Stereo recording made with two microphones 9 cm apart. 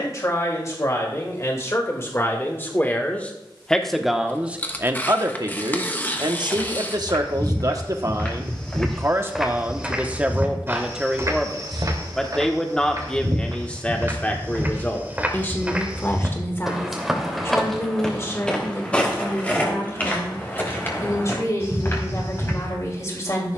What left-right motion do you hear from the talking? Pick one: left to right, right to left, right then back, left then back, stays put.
right then back.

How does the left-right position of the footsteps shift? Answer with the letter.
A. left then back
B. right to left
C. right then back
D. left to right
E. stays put
C.